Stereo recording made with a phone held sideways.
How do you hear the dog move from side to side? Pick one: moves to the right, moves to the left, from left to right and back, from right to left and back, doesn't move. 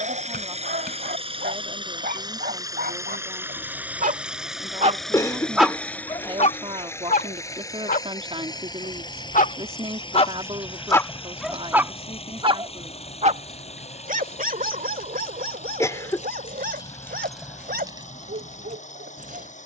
from right to left and back.